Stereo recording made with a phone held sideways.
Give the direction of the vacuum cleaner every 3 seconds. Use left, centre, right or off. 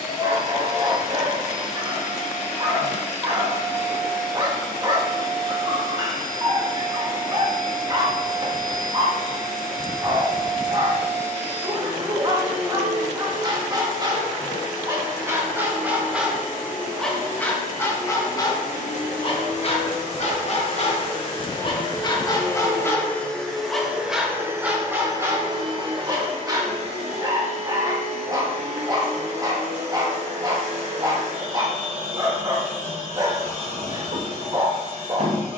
left, left, left, left, left, left, left, left, right, right, right, right.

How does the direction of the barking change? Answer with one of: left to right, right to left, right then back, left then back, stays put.
left then back.